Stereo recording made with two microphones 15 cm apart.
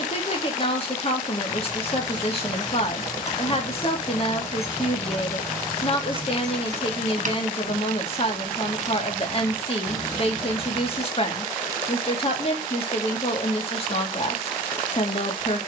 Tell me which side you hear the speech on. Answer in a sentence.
You can hear the speech on the left.